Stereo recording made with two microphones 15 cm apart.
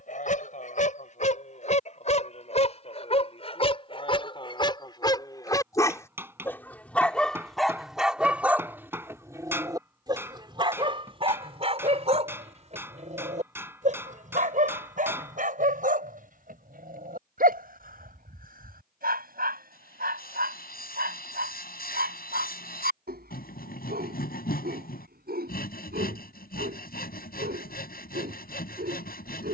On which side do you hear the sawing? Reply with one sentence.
You can hear the sawing on the left.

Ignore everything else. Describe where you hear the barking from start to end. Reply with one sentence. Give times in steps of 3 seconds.
In this clip you hear the barking on the left from 0 s, in the centre from 6 s and on the right from 9 s.